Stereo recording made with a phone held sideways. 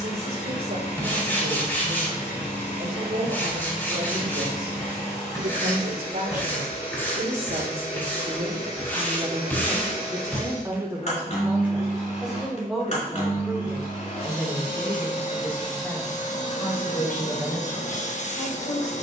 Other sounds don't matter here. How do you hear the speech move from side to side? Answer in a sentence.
You can hear the speech travel towards the left.